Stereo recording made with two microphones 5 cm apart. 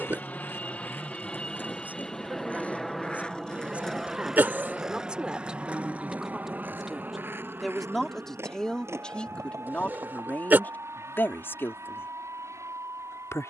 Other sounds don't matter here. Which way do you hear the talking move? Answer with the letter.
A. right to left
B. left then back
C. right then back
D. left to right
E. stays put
A.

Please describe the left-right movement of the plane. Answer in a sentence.
In this clip you hear the plane travel towards the right.